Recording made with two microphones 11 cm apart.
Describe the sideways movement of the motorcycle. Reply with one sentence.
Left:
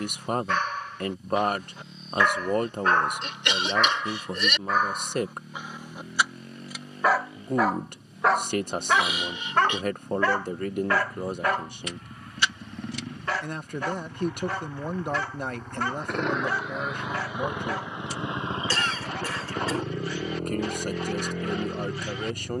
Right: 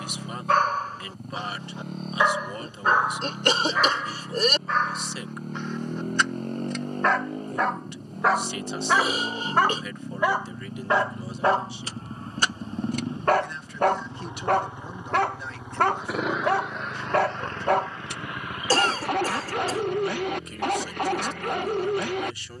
You can hear the motorcycle go from the right side to the left.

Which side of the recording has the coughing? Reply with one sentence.
In this clip you hear the coughing on the right.